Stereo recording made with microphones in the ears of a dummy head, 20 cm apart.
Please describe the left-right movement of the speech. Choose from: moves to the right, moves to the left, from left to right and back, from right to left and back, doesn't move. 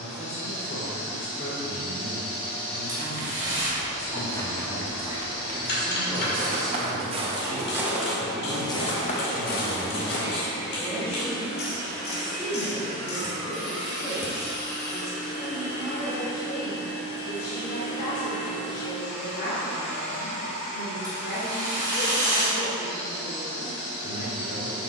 from left to right and back.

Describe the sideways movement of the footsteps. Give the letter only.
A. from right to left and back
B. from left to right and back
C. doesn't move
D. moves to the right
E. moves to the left
B.